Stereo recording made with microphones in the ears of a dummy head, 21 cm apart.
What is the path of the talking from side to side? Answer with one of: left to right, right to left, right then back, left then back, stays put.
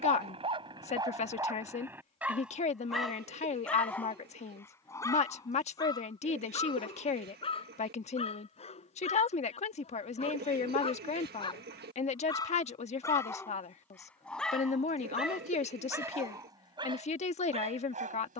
stays put.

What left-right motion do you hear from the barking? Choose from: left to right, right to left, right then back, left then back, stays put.
left then back.